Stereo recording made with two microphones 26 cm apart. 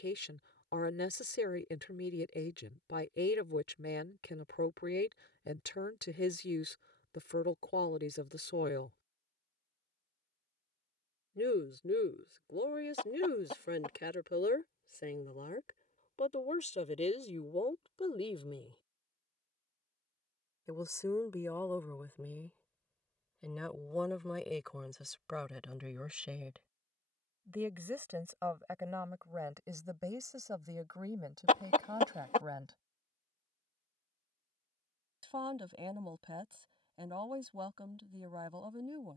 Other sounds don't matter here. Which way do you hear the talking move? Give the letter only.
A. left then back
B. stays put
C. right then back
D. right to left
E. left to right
E.